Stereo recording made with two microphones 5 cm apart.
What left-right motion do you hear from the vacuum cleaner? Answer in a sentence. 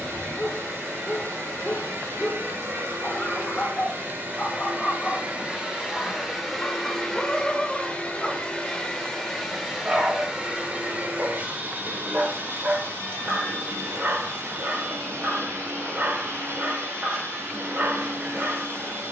You can hear the vacuum cleaner move from right to left and back again.